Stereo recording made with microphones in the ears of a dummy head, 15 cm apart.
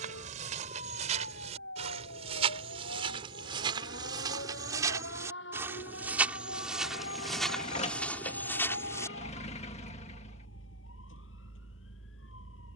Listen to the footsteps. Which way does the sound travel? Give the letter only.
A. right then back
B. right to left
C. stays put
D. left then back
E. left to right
B.